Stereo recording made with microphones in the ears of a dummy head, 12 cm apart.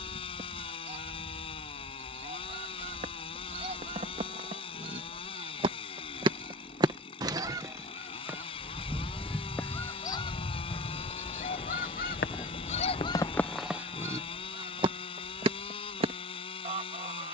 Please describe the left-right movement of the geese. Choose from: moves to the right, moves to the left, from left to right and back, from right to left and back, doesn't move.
from right to left and back.